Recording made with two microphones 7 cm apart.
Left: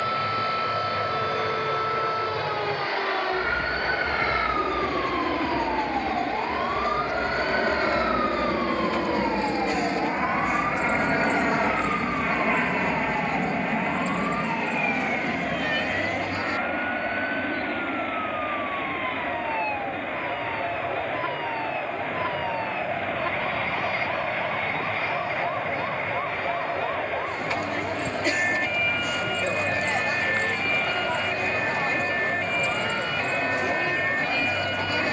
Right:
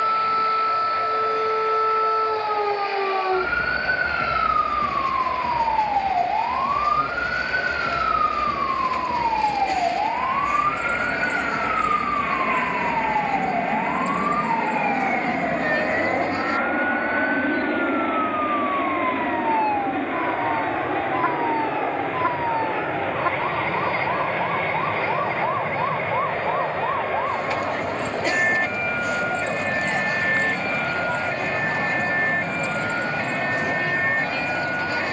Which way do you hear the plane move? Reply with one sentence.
In this clip you hear the plane move from left to right.